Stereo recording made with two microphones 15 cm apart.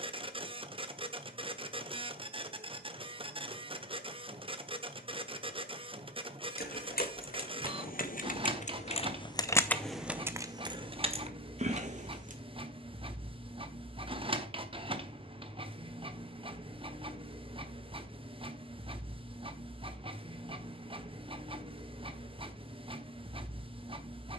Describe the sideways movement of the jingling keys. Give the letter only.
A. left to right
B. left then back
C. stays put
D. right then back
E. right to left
A.